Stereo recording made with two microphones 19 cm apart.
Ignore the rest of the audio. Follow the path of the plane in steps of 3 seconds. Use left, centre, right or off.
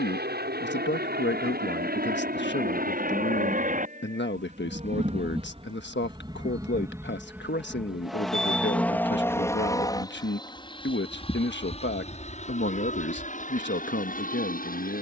right, right, centre, left, left.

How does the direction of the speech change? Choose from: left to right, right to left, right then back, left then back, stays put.
stays put.